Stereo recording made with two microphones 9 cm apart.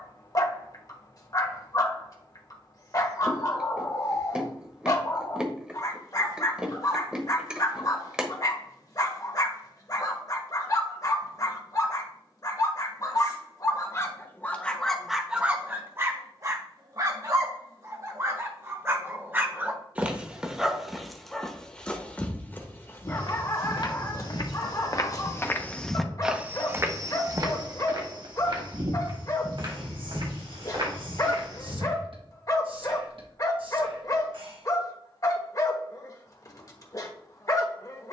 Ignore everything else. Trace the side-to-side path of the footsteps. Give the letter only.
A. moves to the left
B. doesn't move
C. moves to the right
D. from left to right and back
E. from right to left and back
C.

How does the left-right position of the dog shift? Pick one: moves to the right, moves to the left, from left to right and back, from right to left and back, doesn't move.
from left to right and back.